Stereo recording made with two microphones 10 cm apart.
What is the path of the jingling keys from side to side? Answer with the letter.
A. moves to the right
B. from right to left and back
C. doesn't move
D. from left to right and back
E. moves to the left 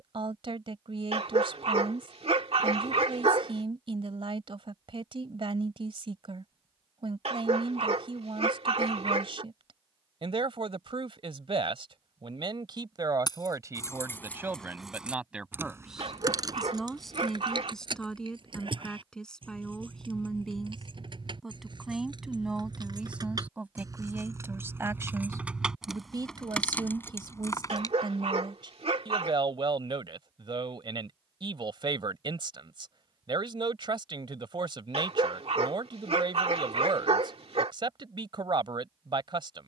D.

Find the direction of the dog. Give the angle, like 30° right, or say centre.
70° right.